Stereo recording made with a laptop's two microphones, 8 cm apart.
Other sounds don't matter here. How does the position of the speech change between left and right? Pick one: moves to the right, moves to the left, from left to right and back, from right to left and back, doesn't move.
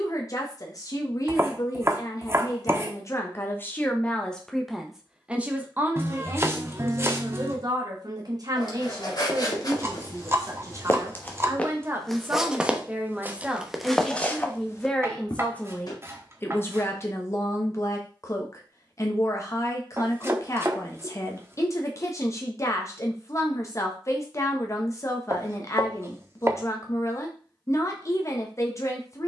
from left to right and back.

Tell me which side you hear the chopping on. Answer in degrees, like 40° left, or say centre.
30° right.